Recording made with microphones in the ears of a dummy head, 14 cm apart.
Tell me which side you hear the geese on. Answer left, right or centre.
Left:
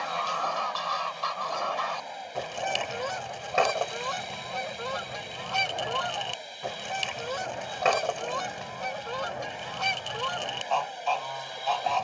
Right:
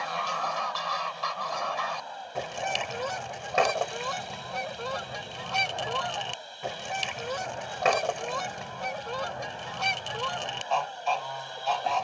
centre.